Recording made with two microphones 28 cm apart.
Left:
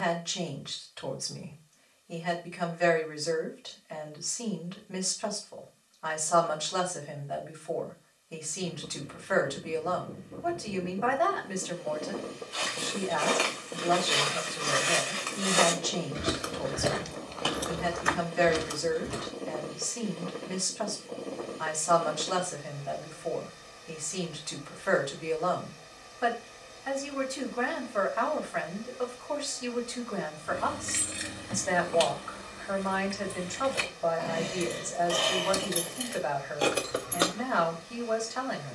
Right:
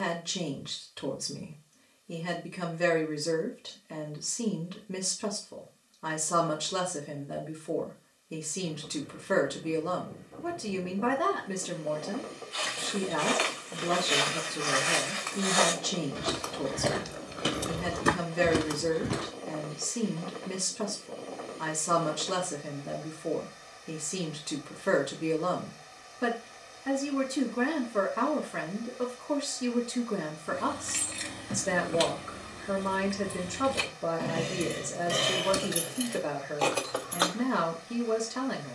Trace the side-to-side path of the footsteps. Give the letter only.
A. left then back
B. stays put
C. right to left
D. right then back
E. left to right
E.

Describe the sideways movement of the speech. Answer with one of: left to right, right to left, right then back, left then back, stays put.
stays put.